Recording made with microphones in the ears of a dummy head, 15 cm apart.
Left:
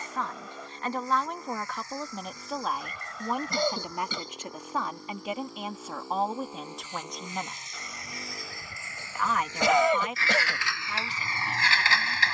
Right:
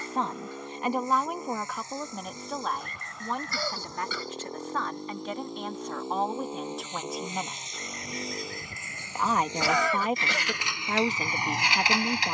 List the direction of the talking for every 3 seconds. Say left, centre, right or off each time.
centre, centre, centre, right.